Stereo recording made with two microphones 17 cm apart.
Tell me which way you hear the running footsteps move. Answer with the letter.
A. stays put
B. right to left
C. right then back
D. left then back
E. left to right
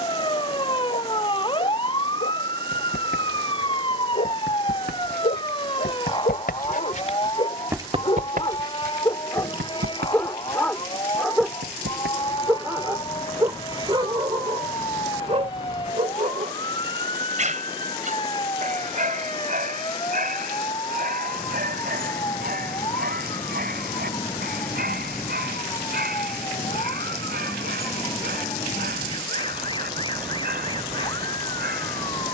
E.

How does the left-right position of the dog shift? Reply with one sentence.
In this clip you hear the dog travel towards the right.